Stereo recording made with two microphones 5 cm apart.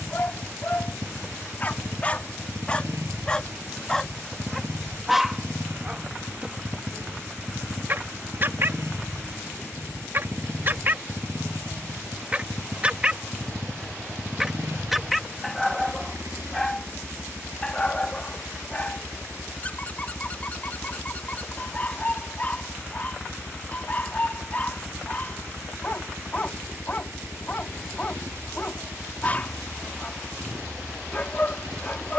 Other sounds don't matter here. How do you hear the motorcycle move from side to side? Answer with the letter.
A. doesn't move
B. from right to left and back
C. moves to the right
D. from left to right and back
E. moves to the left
A.